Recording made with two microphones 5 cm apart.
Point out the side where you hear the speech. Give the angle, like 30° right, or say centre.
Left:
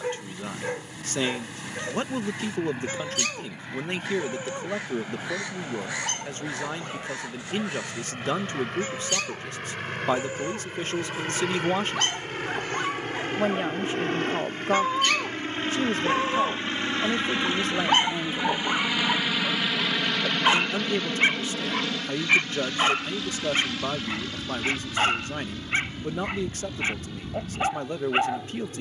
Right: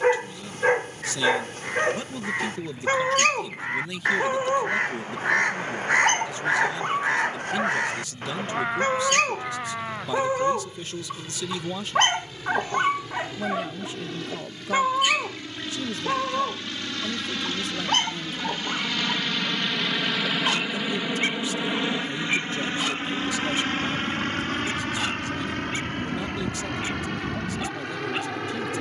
40° left.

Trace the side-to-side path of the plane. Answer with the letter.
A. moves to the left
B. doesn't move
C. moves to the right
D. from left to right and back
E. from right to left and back
C.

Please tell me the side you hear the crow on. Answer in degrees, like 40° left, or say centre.
50° right.